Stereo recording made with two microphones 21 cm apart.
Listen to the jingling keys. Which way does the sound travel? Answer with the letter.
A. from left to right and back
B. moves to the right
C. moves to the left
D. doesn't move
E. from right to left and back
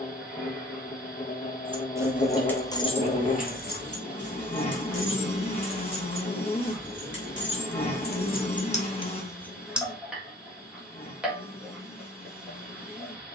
E.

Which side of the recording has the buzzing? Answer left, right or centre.
left.